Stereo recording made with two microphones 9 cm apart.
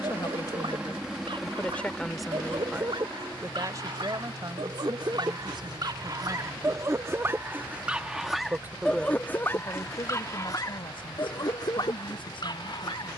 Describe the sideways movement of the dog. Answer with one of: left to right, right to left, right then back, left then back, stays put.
right to left.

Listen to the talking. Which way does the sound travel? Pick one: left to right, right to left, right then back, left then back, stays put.
right then back.